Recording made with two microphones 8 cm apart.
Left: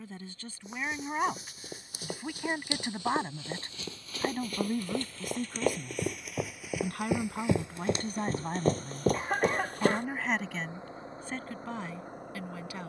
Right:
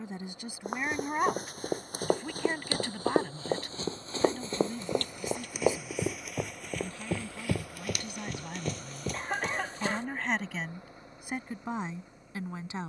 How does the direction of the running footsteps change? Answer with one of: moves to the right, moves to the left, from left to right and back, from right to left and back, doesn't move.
moves to the left.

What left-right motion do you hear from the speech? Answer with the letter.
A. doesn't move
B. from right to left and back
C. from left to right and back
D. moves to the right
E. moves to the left
B.